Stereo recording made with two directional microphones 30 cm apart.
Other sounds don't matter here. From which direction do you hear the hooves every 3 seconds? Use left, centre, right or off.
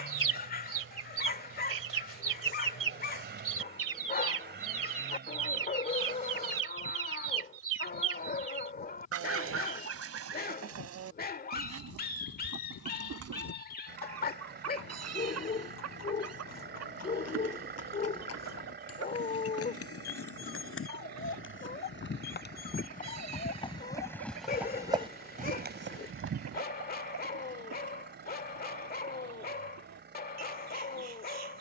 off, off, left, left, left, left, left, left, right, off, off.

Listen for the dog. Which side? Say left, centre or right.
left.